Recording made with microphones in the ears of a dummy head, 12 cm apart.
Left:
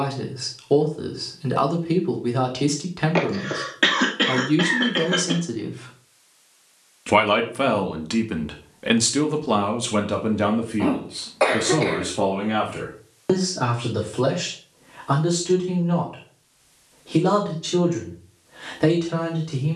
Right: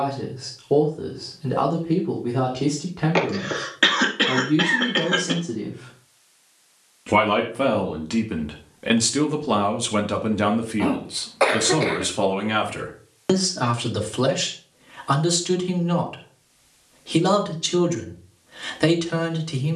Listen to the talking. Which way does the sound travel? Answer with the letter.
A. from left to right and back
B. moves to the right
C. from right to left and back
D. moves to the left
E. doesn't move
B.